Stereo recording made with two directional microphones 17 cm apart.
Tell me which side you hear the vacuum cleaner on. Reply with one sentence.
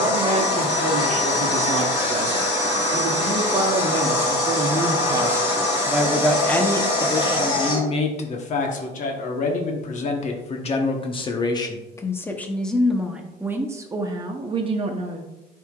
You can hear the vacuum cleaner on the left.